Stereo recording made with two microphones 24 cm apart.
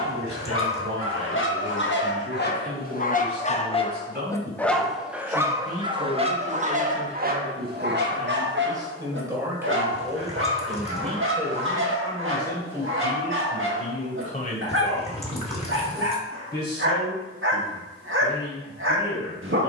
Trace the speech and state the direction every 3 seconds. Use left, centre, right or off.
right, right, right, centre, left, left, left.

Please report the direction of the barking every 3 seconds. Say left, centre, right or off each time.
left, centre, right, right, right, right, right.